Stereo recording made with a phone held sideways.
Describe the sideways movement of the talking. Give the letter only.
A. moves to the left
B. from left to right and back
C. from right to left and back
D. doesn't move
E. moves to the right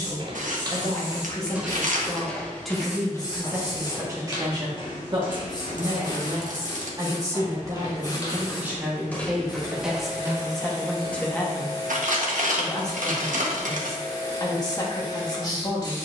B.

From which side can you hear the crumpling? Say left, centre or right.
right.